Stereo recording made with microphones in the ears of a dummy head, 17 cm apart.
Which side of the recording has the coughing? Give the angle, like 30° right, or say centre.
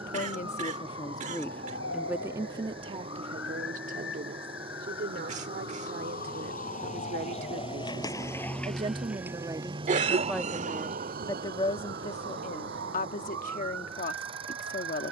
40° right.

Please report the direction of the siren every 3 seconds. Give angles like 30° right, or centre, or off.
70° left, 60° left, 30° left, 30° right, 60° right.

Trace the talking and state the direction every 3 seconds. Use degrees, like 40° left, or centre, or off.
10° left, 50° right, 40° right, centre, 40° left.